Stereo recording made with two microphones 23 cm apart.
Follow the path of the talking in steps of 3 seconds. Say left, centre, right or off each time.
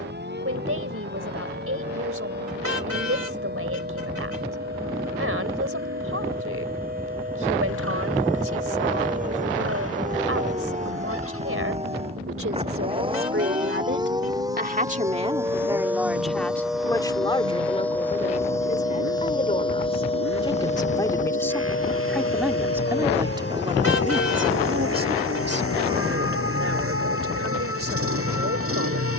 right, right, right, right, right, centre, left, centre, right, right.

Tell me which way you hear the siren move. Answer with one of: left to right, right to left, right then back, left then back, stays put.
right to left.